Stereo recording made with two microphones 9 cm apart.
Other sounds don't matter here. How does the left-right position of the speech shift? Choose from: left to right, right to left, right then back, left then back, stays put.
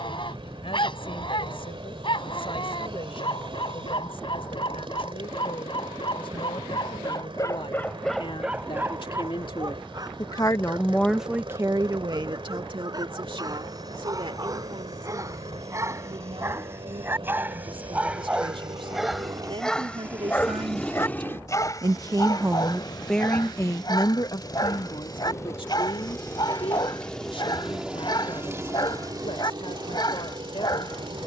right then back.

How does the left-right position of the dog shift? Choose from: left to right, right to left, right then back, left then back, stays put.
right then back.